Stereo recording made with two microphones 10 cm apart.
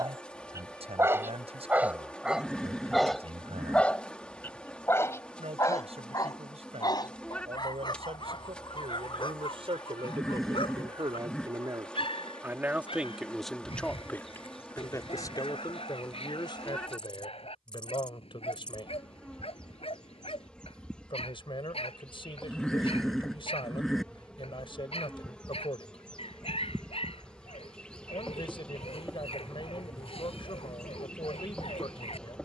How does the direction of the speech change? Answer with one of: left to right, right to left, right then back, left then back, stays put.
right to left.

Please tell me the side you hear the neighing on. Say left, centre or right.
centre.